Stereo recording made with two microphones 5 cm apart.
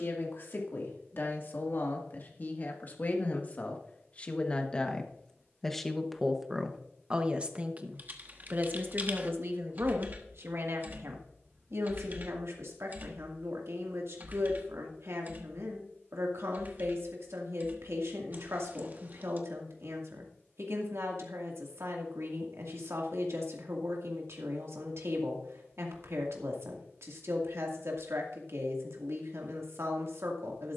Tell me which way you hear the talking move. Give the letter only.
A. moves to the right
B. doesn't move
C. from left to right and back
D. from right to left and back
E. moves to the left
A.